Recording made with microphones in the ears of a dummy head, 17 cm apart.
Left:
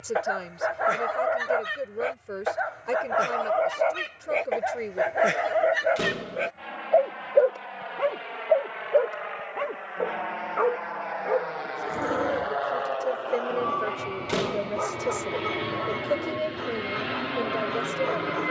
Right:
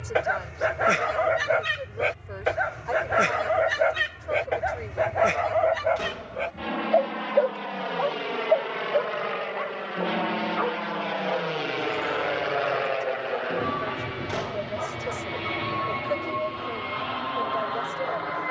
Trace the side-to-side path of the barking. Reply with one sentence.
In this clip you hear the barking go from the right side to the left.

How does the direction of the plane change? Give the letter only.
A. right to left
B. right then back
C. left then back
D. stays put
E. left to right
A.